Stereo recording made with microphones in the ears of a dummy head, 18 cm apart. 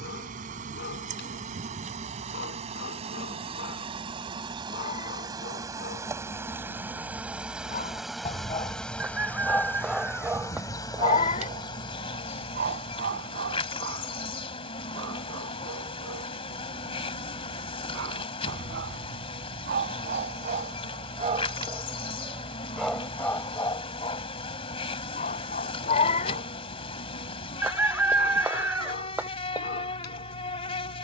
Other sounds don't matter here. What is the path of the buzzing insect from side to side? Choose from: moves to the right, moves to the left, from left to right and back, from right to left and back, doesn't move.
moves to the left.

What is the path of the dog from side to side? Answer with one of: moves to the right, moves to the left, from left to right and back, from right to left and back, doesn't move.
from left to right and back.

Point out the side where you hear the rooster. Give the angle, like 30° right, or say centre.
10° right.